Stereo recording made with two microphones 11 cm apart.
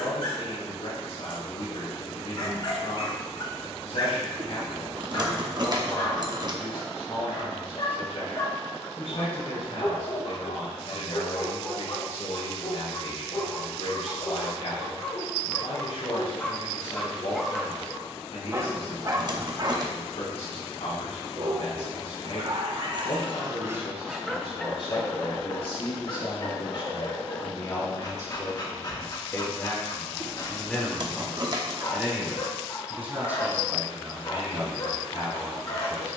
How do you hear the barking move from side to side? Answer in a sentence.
In this clip you hear the barking go right and come back.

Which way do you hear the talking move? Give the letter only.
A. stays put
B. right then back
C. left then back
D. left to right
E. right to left
D.